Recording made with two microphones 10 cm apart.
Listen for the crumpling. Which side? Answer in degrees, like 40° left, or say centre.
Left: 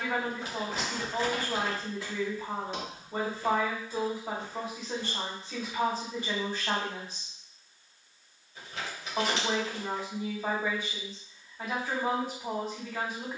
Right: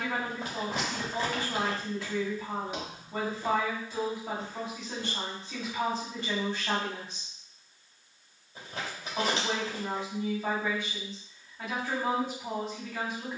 50° right.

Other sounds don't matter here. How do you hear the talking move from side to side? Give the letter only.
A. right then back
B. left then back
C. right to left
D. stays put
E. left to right
D.